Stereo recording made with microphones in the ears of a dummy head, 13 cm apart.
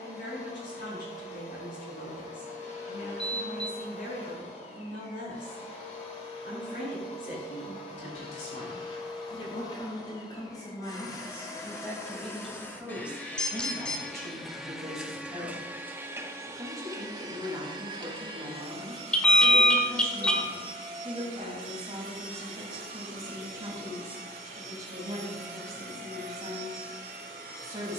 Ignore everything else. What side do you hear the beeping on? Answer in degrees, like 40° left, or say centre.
10° left.